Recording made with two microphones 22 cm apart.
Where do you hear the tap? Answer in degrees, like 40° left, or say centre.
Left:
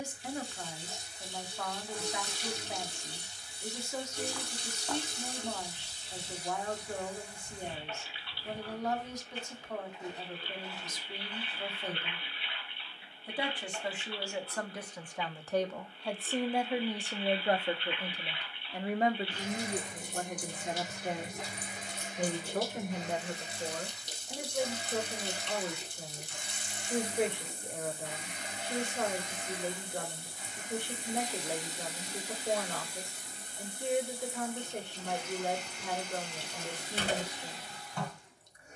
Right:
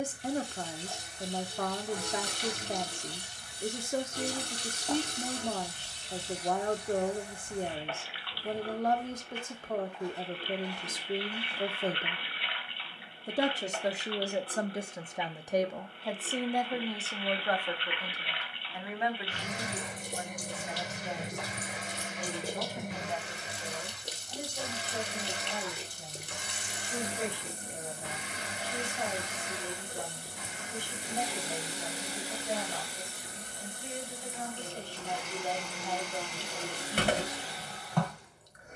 70° right.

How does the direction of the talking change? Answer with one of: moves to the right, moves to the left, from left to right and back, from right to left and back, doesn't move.
moves to the left.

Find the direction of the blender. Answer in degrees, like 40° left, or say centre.
80° right.